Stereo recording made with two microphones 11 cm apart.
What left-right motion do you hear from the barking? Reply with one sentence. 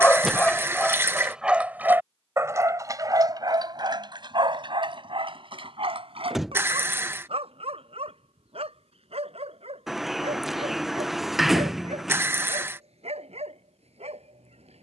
You can hear the barking move to the right.